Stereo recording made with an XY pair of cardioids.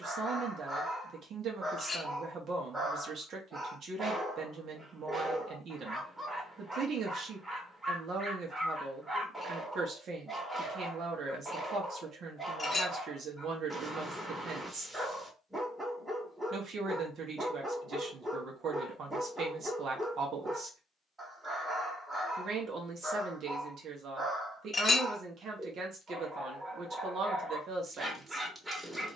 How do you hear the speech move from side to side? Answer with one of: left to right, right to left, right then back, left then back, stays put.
stays put.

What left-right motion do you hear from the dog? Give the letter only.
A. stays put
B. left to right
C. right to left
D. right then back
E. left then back
A.